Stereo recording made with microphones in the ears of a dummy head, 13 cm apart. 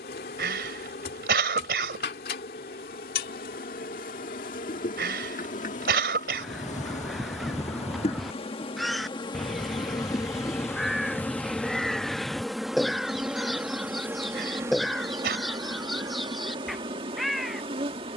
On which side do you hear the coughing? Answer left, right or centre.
right.